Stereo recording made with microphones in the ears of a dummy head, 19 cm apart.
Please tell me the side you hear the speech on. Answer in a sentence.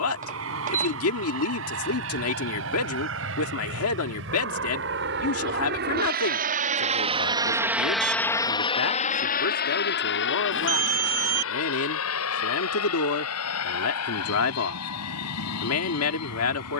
You can hear the speech on the left.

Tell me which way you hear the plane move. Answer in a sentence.
In this clip you hear the plane go from the right side to the left.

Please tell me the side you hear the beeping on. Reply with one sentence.
In this clip you hear the beeping on the right.